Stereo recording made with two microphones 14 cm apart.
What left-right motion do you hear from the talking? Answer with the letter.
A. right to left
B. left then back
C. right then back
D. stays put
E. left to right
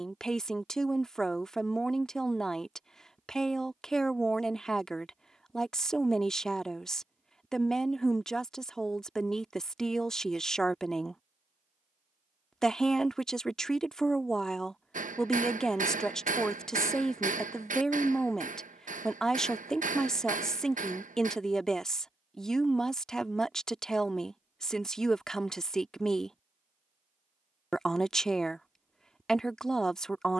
D.